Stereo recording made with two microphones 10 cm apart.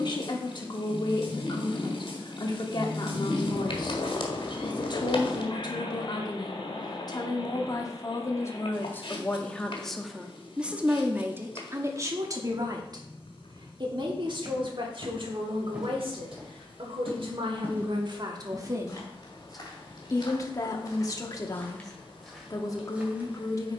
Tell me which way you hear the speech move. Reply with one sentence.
You can hear the speech move from left to right and back again.